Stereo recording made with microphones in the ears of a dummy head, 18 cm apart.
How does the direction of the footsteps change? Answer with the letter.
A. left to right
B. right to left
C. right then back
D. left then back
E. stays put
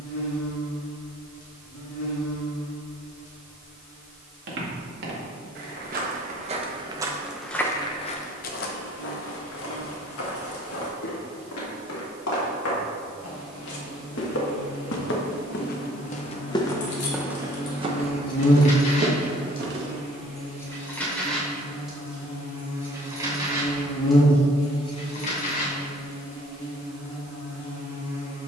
D.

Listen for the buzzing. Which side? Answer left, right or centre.
left.